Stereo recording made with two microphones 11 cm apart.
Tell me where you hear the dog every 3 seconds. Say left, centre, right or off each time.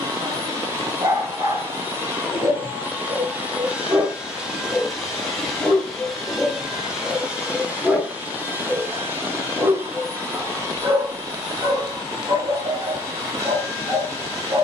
right, right, centre, right, right.